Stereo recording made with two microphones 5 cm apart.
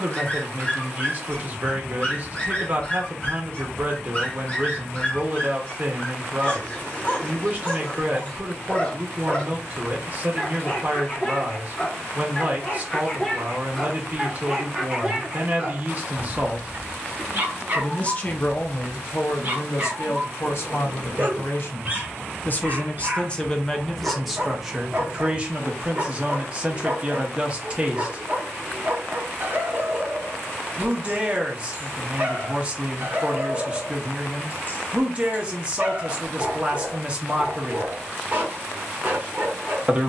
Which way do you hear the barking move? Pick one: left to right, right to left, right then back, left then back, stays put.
left to right.